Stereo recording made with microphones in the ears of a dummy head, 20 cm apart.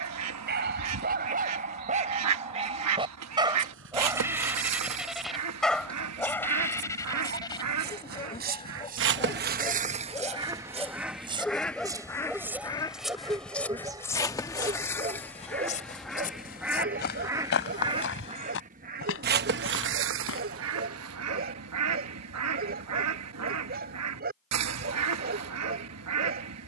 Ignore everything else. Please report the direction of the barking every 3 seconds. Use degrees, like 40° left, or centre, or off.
40° right, 10° right, 20° left, 10° left, 10° right, 40° right, 40° right, 40° right, 40° right.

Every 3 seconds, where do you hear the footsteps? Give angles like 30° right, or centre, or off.
off, 60° right, 50° right, 30° right, centre, 40° left, 60° left, off, off.